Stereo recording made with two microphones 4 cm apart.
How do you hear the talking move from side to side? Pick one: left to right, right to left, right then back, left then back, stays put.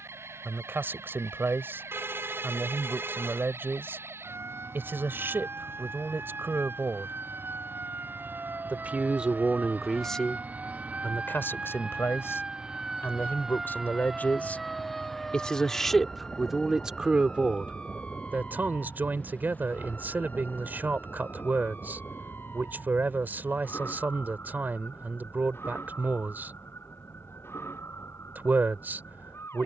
left then back.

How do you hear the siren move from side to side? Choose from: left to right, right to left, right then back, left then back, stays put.
right to left.